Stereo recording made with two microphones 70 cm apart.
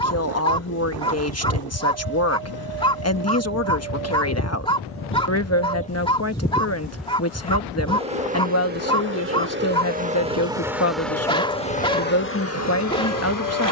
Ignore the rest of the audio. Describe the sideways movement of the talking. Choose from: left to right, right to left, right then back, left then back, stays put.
stays put.